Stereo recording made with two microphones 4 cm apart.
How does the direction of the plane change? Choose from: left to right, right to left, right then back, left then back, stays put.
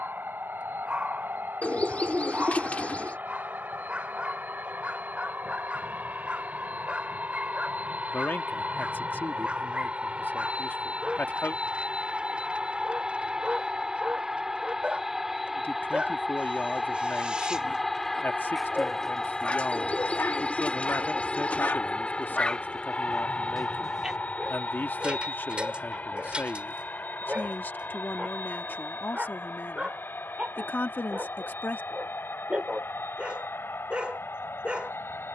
right to left.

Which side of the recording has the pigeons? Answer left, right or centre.
left.